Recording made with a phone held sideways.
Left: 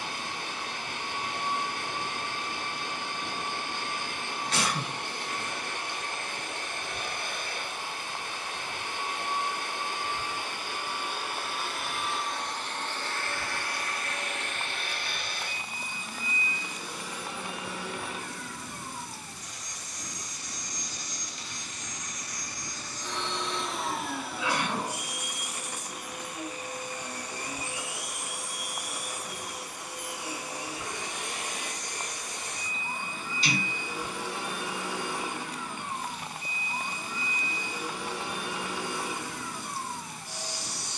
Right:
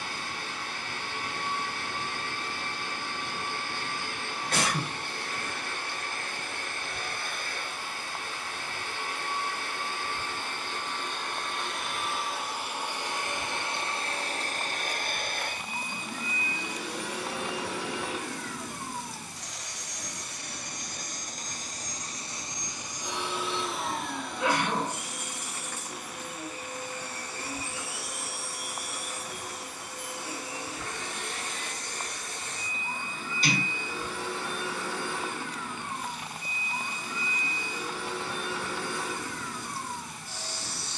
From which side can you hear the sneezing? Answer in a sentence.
In this clip you hear the sneezing on the right.